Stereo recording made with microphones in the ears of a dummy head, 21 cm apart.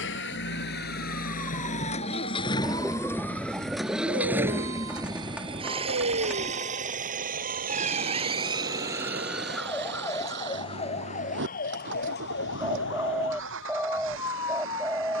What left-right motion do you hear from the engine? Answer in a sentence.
You can hear the engine travel towards the right.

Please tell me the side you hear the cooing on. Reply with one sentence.
In this clip you hear the cooing in the centre.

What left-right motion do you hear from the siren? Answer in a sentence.
You can hear the siren move to the left.